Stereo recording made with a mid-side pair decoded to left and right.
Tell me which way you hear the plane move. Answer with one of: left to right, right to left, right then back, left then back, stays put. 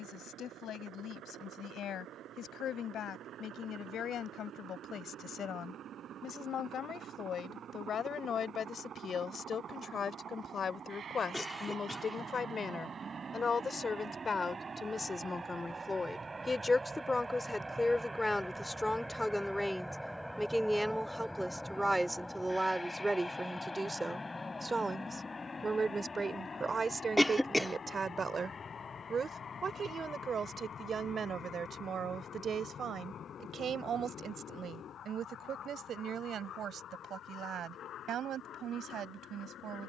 right to left.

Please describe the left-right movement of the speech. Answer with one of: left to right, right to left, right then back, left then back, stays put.
left to right.